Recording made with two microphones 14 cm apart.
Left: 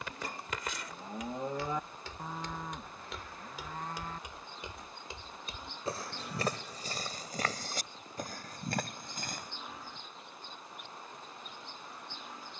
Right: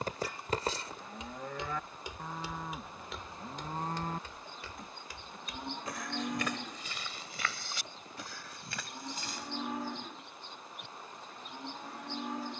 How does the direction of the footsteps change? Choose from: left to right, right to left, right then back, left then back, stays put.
right to left.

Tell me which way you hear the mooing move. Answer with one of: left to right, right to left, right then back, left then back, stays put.
left to right.